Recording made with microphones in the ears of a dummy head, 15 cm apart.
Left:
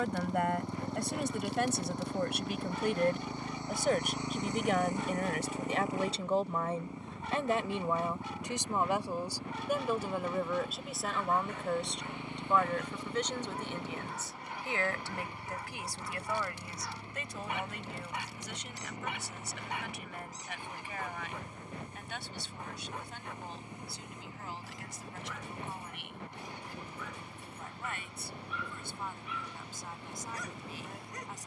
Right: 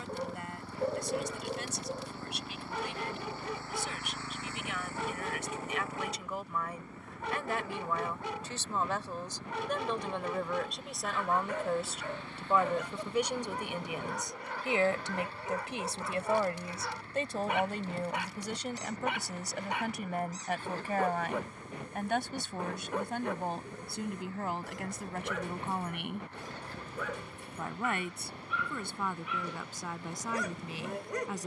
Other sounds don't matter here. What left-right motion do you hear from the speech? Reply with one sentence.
In this clip you hear the speech travel towards the right.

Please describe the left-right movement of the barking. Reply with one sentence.
In this clip you hear the barking stay in one place.